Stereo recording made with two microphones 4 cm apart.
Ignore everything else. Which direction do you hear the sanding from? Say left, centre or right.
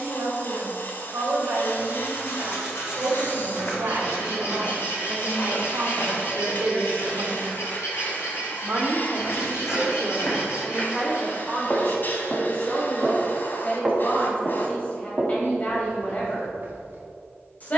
left.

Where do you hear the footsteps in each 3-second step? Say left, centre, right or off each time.
off, left, left, left, centre, right.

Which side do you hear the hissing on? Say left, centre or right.
left.